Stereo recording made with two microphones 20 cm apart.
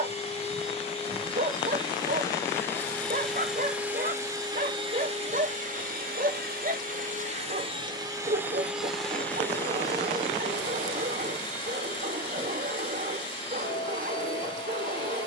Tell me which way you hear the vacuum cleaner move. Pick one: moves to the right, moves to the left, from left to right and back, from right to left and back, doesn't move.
from left to right and back.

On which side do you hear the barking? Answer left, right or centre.
right.